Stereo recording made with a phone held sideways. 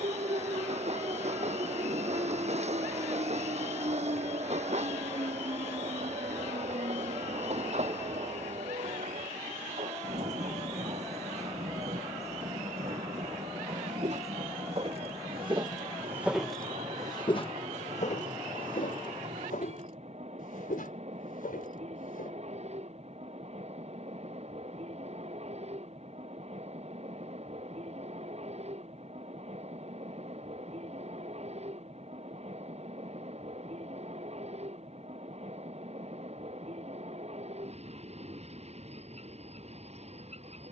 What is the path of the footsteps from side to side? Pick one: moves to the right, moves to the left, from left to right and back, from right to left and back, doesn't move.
moves to the left.